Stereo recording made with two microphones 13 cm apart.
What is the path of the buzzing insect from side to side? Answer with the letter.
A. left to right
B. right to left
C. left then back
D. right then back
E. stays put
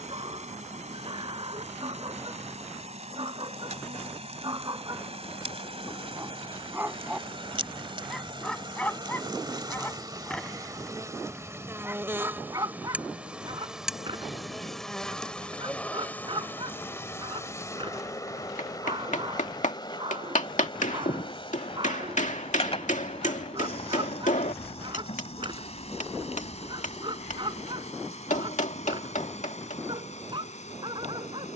B.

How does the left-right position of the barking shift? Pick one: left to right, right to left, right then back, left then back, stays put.
left then back.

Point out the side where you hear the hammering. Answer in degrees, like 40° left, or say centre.
70° left.